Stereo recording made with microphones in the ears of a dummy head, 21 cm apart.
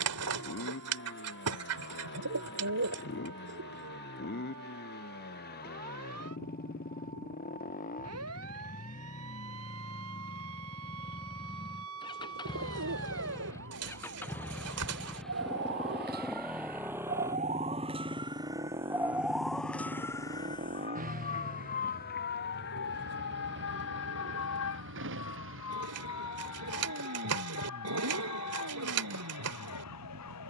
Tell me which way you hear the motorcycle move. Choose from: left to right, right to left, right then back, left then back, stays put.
left to right.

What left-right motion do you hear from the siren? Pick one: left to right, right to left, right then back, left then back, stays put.
right to left.